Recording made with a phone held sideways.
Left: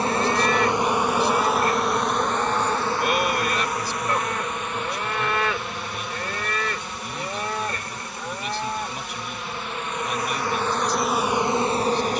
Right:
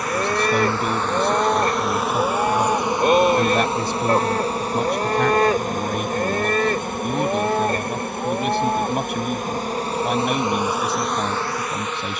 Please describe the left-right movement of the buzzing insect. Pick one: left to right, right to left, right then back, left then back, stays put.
right then back.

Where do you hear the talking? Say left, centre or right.
right.